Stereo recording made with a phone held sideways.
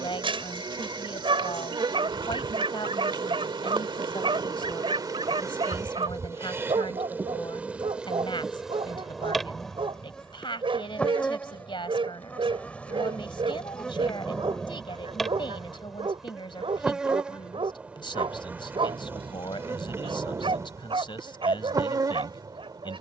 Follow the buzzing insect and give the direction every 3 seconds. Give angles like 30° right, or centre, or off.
30° right, 30° right, 10° right, 10° left, 10° left, centre, 20° right, 30° right.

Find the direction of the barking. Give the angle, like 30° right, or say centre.
40° right.